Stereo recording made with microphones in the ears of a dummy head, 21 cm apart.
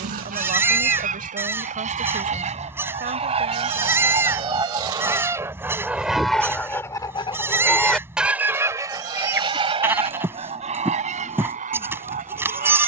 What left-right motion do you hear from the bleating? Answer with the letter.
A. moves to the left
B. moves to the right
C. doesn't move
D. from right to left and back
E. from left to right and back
C.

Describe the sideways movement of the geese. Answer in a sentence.
You can hear the geese go left and come back.